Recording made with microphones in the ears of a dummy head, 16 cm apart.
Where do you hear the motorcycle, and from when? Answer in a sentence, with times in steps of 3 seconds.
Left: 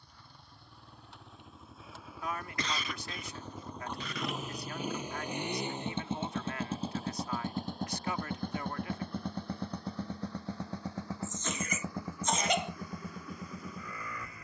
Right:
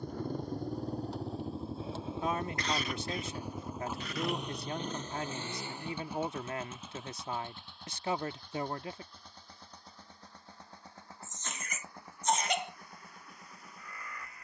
In this clip you hear the motorcycle on the right from 0 s, in the centre from 3 s and on the left from 6 s.